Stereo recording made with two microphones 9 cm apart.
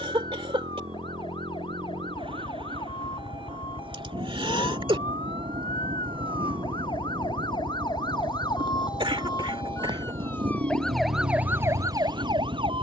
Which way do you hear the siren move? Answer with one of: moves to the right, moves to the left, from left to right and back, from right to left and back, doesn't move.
moves to the right.